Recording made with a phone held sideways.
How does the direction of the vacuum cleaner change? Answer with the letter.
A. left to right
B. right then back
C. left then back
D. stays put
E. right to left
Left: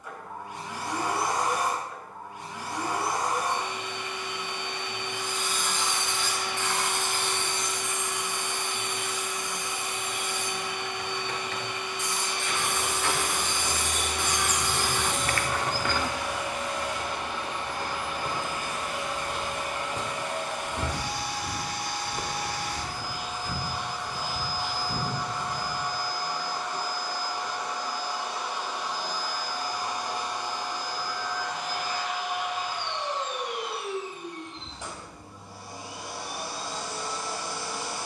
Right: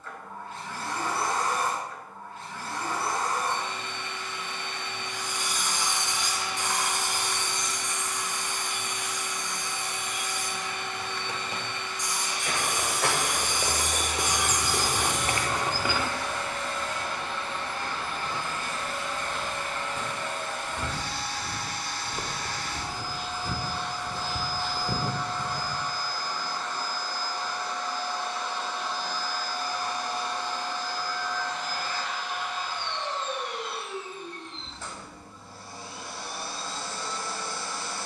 D.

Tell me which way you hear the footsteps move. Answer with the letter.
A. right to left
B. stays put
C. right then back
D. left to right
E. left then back
E.